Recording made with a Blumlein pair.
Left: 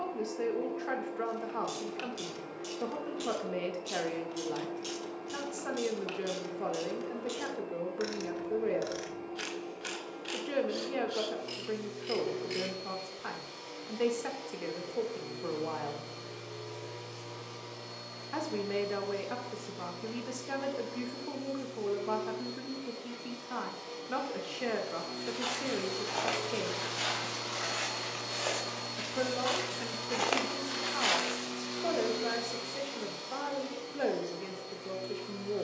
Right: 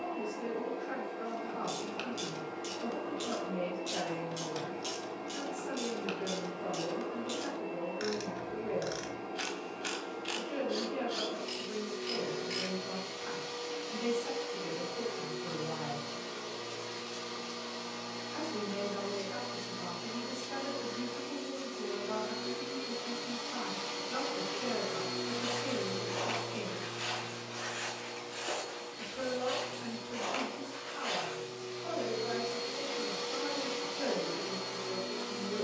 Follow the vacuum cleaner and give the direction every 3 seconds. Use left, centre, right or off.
right, right, right, right, right, right, right, right, centre, left, left, right.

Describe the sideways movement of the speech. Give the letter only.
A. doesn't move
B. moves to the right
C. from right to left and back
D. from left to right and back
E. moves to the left
A.